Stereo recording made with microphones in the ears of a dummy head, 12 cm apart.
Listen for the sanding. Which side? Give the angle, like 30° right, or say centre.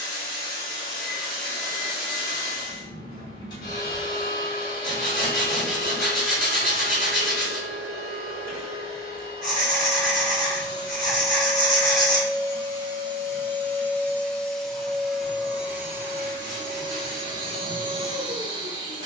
centre.